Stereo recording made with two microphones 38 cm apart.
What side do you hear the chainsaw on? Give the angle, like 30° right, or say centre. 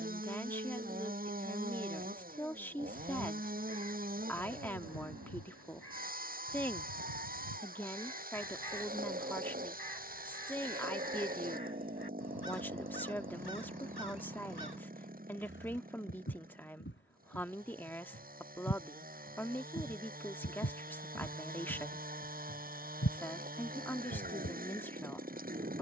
20° right.